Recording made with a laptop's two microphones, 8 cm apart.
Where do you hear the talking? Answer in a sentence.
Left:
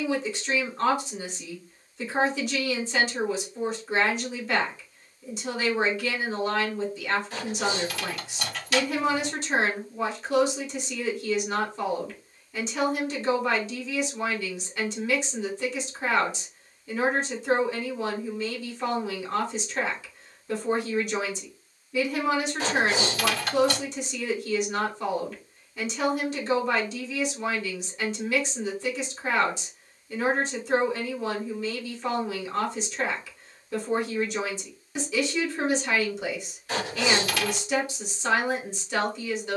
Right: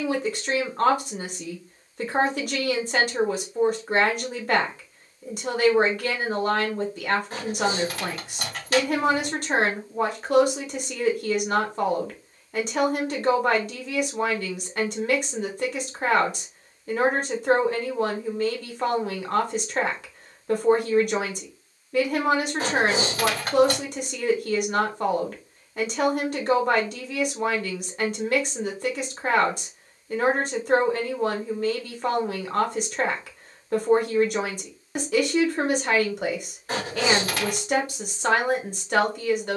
You can hear the talking on the right.